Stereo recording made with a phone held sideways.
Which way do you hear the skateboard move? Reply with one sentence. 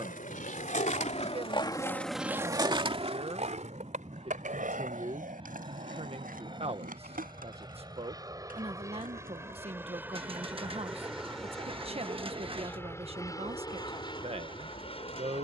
In this clip you hear the skateboard travel towards the right.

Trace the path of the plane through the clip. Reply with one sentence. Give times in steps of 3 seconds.
You can hear the plane on the right from 0 s, in the centre from 9 s and on the left from 12 s.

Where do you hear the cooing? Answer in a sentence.
You can hear the cooing on the right.